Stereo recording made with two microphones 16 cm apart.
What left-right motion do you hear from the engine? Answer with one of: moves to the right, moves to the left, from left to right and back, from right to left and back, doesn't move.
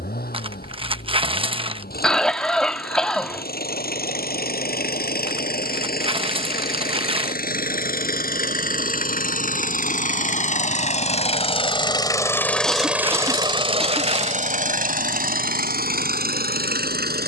moves to the right.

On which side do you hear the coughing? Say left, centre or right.
centre.